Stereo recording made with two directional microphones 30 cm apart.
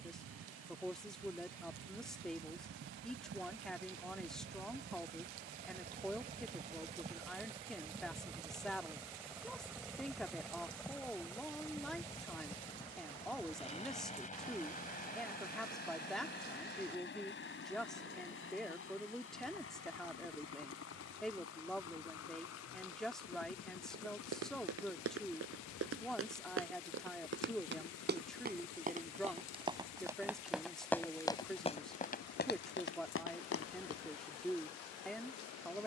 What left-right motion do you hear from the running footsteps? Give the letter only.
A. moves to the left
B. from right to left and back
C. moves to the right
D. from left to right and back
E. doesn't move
A.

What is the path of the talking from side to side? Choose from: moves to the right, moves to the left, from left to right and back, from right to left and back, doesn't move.
doesn't move.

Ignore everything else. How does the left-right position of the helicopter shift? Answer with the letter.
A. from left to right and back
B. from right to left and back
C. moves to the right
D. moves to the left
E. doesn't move
D.